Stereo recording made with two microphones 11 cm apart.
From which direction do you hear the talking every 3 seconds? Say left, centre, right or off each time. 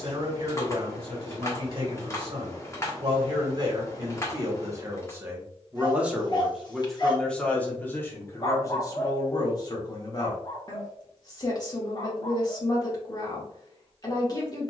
right, right, centre, left, left.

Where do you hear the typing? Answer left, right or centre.
left.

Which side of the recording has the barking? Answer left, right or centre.
left.